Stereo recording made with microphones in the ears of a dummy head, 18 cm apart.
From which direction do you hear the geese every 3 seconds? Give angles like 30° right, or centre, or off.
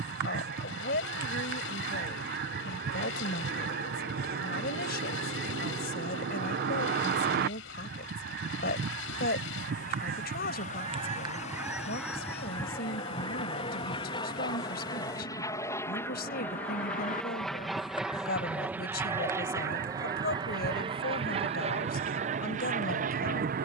50° right, 50° right, 50° right, 30° right, 20° left, 40° left, 30° right, 40° right.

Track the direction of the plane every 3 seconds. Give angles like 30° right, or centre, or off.
60° left, 50° left, 50° left, 40° left, 30° left, 10° left, 10° right, 30° right.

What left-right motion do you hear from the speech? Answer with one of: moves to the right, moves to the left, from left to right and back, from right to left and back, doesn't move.
doesn't move.